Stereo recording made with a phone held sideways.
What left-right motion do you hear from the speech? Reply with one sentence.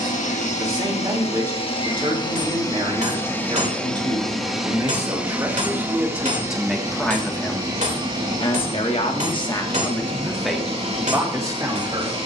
In this clip you hear the speech move from right to left and back again.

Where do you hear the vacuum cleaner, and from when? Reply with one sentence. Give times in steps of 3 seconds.
You can hear the vacuum cleaner on the left from 0 s, in the centre from 3 s and on the right from 6 s.